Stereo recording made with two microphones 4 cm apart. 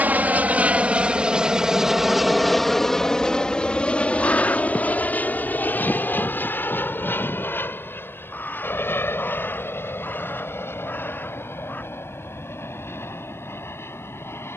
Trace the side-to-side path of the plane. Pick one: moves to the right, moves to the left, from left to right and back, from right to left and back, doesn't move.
moves to the left.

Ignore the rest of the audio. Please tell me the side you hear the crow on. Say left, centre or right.
left.